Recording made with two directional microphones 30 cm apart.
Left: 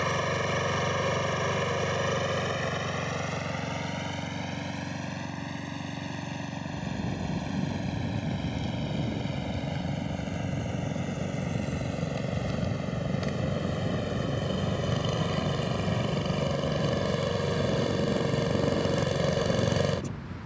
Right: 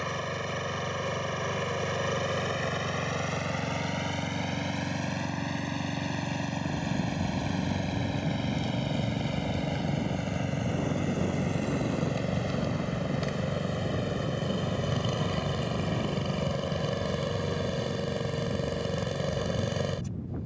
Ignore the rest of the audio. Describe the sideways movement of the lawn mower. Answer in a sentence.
In this clip you hear the lawn mower move from left to right and back again.